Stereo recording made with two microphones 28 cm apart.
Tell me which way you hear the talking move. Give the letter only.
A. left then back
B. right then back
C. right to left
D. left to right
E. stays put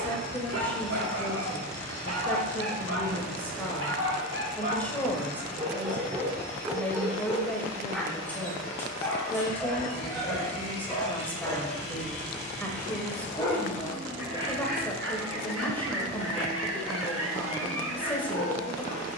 E.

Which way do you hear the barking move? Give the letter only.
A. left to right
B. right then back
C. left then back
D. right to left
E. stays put
C.